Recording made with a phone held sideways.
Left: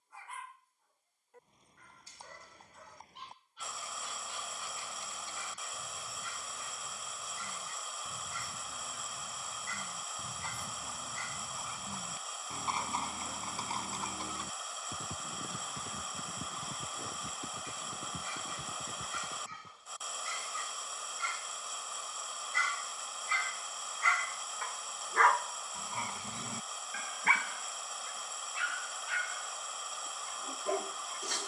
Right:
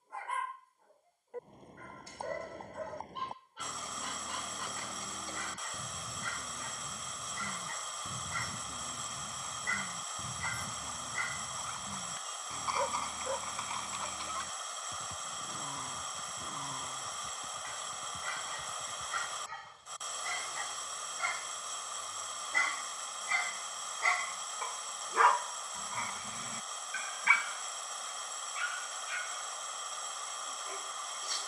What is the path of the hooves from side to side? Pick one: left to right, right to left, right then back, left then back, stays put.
right to left.